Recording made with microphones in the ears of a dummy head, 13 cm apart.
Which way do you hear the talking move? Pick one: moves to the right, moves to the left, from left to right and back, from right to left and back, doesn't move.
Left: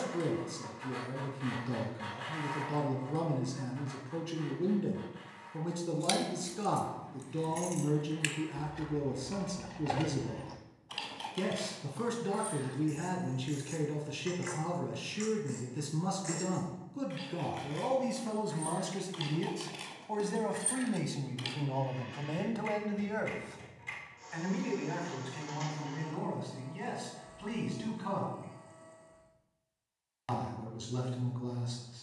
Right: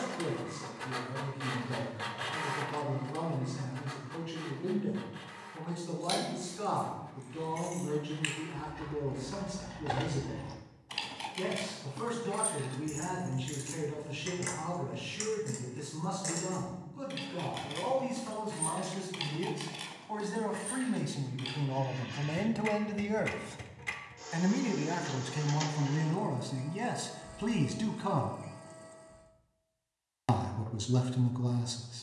moves to the right.